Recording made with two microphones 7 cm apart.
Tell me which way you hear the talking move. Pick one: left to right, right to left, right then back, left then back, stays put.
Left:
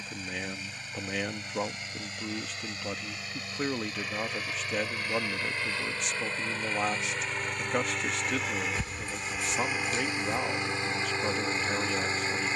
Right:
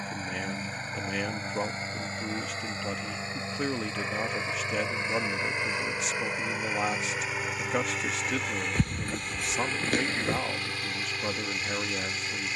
stays put.